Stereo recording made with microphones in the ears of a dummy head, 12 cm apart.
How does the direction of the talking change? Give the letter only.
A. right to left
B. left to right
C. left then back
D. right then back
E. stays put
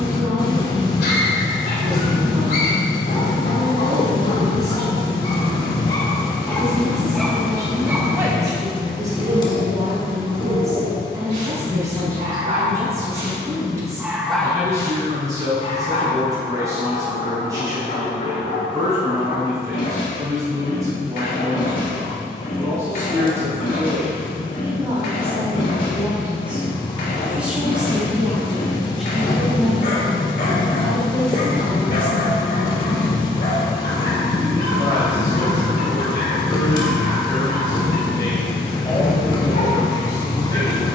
A.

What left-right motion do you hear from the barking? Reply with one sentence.
In this clip you hear the barking go right and come back.